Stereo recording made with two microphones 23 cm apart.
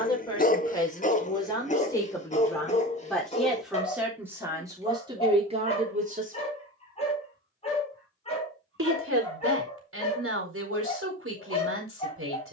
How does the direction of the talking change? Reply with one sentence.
In this clip you hear the talking move from left to right.